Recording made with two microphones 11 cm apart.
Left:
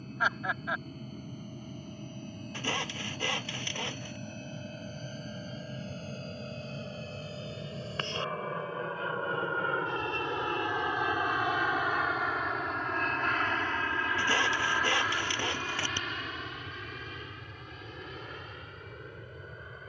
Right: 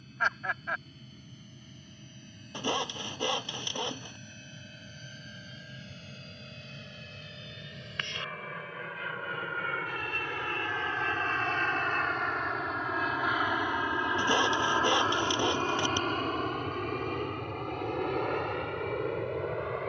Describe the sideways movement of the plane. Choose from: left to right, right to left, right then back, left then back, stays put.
left to right.